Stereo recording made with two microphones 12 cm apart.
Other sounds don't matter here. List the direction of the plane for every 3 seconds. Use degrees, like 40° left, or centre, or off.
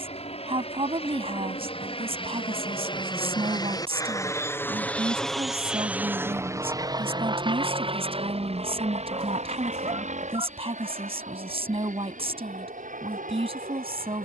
60° left, 20° left, 40° right, 60° right, 70° right.